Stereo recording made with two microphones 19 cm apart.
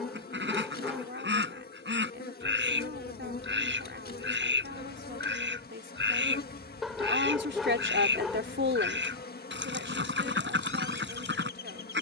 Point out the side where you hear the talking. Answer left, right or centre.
right.